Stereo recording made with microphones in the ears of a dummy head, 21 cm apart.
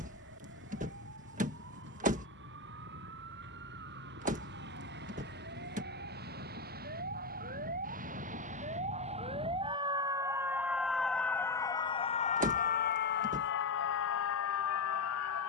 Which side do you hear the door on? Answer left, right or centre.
right.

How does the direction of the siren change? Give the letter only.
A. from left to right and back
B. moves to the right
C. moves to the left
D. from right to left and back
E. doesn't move
C.